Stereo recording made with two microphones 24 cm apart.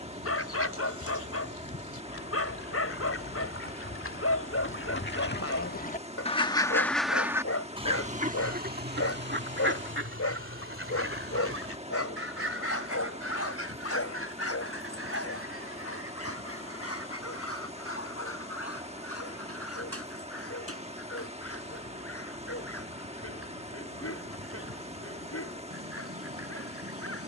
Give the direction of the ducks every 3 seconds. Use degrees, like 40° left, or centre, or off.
80° left, 60° left, 10° right, 60° right, 70° right, 80° right, 80° right, 80° right, 80° right.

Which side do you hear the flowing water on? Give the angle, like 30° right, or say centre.
30° right.